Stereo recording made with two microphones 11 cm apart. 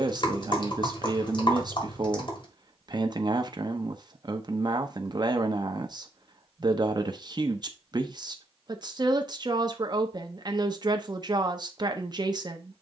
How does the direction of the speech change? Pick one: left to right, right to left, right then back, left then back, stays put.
stays put.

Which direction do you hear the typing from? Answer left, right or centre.
left.